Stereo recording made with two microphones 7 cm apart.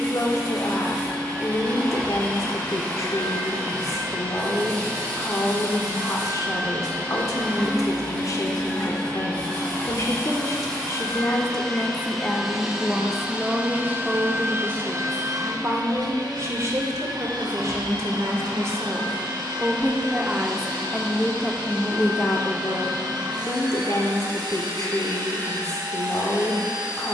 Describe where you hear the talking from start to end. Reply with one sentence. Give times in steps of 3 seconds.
In this clip you hear the talking on the left from 0 s, in the centre from 12 s, on the right from 15 s and on the left from 21 s.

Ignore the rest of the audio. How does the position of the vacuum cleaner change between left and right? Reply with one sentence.
In this clip you hear the vacuum cleaner move to the right.